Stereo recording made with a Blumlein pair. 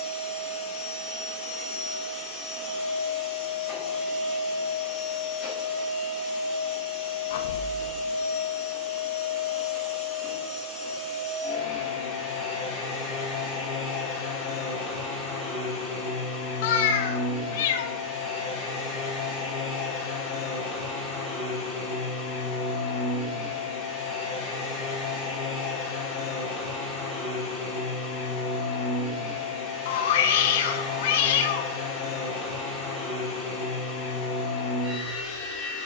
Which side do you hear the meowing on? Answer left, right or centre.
left.